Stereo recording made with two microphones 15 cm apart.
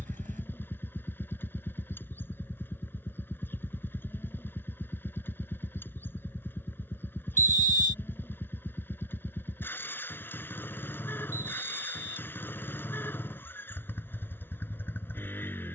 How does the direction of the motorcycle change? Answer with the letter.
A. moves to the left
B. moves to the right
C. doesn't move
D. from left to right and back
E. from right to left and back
C.